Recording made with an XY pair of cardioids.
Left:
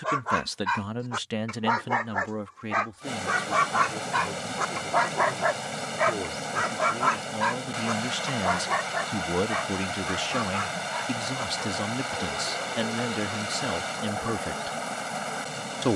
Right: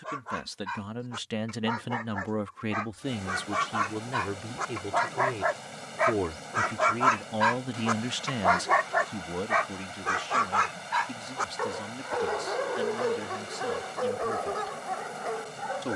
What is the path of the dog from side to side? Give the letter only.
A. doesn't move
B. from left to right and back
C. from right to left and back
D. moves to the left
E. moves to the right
E.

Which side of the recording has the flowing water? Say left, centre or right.
left.